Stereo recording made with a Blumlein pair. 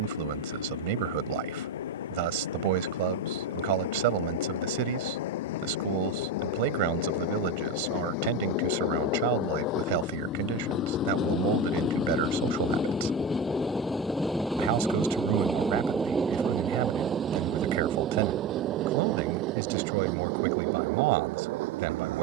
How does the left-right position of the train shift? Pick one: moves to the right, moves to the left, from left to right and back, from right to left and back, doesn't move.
moves to the right.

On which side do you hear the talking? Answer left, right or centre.
right.